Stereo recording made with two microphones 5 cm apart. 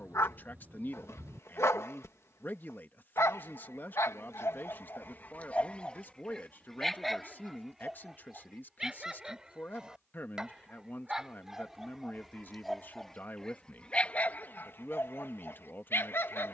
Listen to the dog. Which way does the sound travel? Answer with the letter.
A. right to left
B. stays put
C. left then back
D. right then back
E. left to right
D.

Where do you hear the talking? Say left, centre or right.
left.